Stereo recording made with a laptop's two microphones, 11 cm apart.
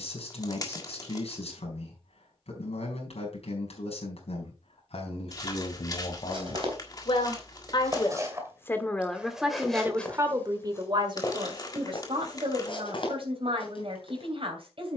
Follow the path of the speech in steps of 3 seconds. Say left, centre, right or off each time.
left, left, left, right, right.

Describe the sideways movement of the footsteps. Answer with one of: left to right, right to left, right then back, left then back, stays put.
right to left.